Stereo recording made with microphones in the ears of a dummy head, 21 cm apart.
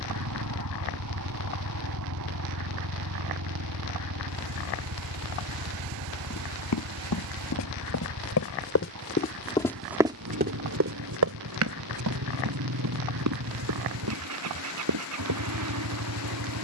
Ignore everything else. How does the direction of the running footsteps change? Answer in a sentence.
You can hear the running footsteps move to the right.